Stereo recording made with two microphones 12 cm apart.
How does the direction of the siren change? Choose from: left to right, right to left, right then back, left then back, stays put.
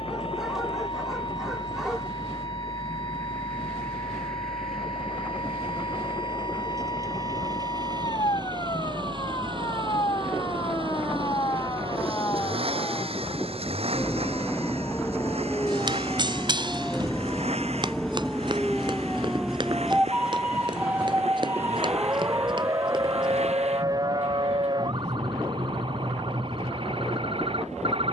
left to right.